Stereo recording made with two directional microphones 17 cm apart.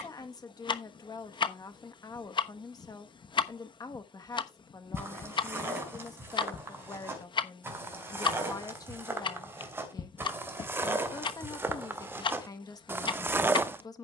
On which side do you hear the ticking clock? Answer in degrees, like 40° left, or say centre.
30° left.